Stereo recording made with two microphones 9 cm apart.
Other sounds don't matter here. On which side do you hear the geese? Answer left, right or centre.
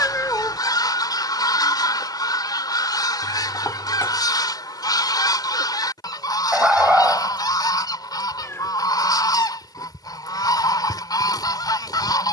left.